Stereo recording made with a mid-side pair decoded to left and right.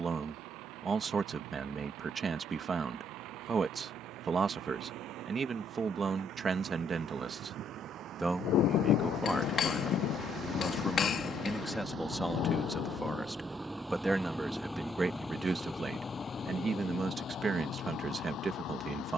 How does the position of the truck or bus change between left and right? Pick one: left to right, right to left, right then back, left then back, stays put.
right to left.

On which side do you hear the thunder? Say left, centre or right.
left.